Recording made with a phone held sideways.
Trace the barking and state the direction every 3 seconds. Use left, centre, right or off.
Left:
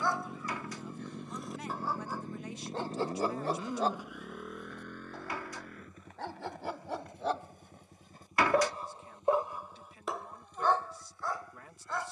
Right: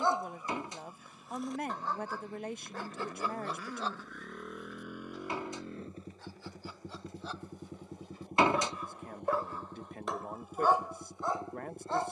centre, left, left, centre.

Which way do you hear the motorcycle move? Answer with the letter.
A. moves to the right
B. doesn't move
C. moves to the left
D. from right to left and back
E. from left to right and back
A.